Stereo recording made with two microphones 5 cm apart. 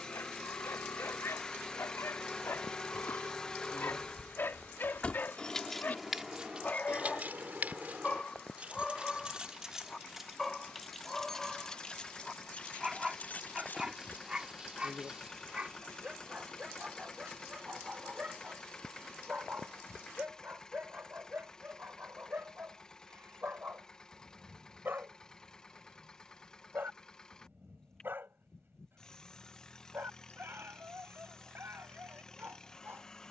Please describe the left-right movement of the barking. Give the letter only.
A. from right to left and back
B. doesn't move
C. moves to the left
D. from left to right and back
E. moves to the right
E.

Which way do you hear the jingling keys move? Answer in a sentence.
You can hear the jingling keys move from left to right and back again.